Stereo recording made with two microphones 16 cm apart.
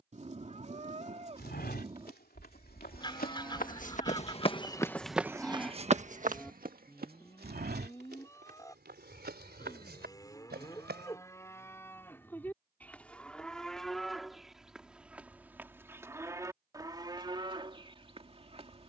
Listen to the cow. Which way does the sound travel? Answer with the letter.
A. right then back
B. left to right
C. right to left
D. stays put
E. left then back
E.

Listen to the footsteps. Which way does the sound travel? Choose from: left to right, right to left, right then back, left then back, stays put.
left to right.